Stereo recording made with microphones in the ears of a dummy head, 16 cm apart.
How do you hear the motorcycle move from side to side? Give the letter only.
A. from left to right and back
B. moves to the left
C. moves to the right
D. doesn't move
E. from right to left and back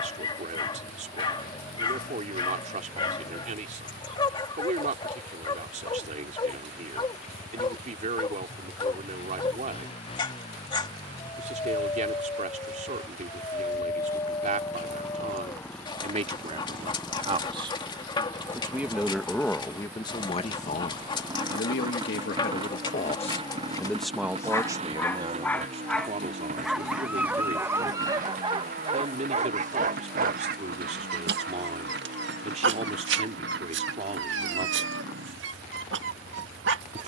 C.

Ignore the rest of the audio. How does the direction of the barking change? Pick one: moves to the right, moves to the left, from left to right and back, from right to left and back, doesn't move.
moves to the right.